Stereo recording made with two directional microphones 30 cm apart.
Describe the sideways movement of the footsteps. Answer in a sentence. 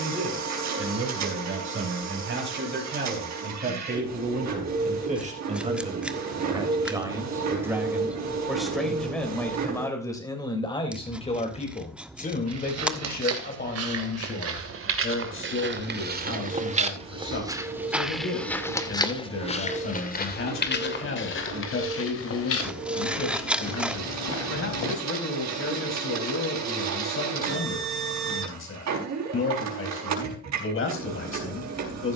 In this clip you hear the footsteps move from right to left.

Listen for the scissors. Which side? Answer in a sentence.
You can hear the scissors in the centre.